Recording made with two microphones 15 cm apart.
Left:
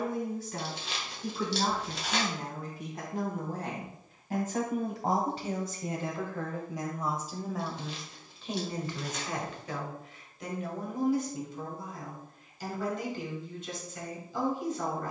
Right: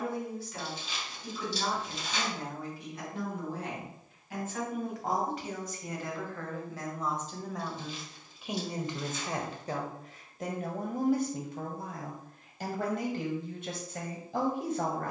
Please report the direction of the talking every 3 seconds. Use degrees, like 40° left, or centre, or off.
50° left, 40° left, centre, 50° right, 60° right.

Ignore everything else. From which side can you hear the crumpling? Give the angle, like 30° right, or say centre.
70° left.